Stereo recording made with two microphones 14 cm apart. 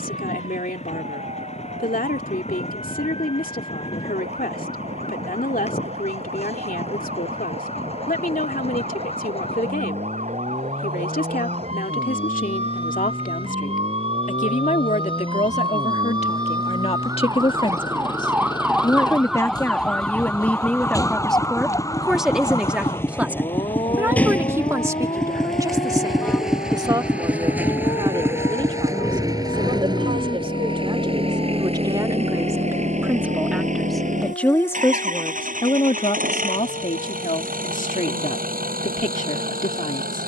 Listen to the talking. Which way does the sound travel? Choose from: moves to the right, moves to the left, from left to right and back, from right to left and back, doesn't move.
from left to right and back.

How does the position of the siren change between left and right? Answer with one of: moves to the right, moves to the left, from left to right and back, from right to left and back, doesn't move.
moves to the left.